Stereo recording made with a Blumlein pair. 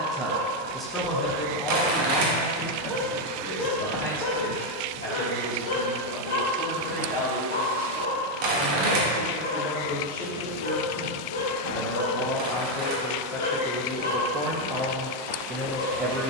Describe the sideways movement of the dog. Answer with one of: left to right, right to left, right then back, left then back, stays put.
right to left.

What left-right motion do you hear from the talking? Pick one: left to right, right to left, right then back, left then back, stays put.
left then back.